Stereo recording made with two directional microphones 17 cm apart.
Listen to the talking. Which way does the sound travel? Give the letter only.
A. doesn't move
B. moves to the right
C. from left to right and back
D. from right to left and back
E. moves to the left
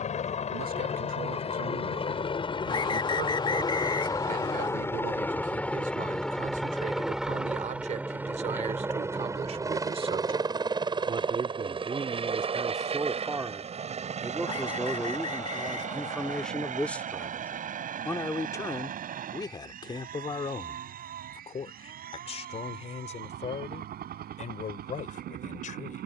E.